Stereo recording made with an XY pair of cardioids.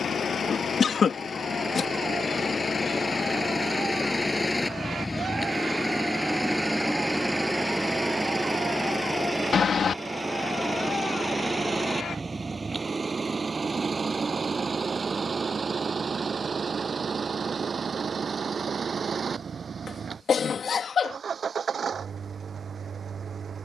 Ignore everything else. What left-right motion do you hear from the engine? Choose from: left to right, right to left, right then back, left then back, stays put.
left to right.